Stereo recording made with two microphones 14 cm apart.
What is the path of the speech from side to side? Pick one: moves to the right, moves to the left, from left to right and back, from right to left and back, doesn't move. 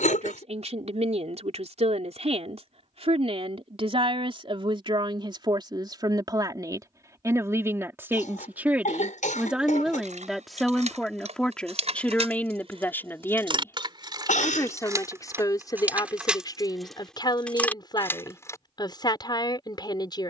moves to the left.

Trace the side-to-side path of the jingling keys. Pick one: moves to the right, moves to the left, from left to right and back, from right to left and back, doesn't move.
moves to the left.